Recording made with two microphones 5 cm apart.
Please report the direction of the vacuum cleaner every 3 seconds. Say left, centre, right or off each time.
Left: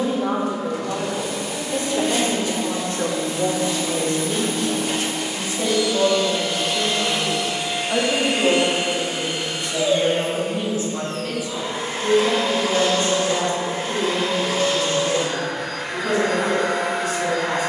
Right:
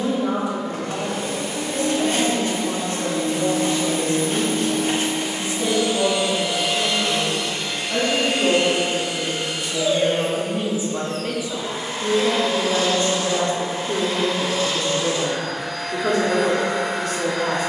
right, right, centre, left, left, left.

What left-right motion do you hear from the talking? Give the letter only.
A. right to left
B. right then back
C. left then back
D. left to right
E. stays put
D.